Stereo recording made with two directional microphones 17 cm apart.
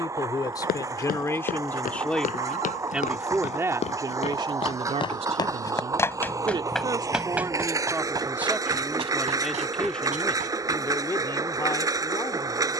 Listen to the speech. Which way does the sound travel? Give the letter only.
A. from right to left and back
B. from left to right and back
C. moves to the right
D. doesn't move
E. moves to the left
B.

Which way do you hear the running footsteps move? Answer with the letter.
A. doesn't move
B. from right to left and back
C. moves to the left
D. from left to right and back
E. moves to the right
E.